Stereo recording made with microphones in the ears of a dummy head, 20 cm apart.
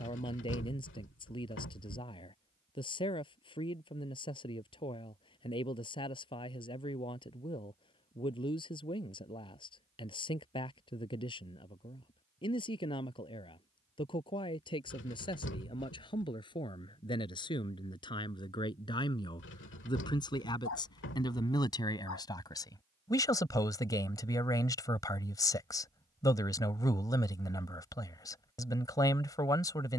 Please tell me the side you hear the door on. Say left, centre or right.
left.